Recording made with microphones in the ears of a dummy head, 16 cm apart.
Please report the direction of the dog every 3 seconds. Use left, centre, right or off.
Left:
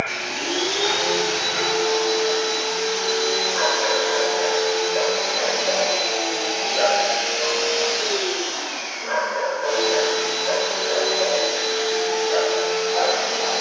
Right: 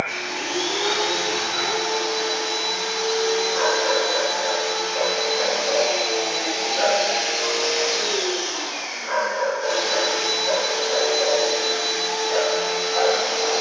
left, left, left, centre, centre.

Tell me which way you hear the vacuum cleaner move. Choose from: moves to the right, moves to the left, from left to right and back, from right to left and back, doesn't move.
moves to the right.